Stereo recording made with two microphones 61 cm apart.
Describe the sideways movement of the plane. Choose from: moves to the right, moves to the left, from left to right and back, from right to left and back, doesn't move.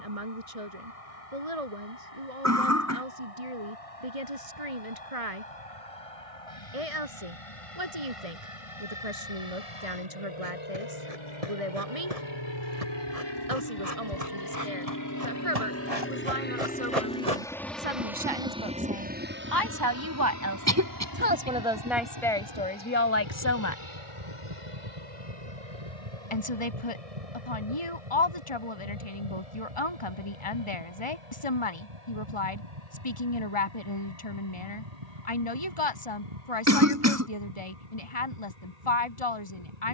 moves to the right.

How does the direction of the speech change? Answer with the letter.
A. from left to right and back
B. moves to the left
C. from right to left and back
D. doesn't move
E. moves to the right
B.